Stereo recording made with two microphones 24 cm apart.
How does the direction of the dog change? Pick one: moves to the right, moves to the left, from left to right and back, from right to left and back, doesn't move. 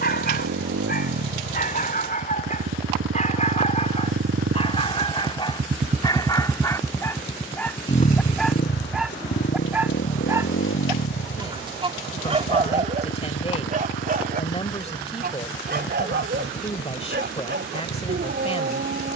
moves to the right.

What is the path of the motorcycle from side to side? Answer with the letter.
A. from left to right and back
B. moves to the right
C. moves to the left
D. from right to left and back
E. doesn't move
C.